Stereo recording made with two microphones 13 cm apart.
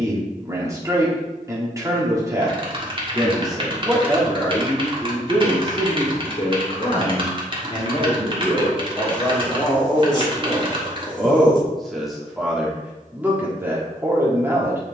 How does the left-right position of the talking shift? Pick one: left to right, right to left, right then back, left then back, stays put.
left then back.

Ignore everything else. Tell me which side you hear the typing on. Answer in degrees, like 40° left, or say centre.
40° right.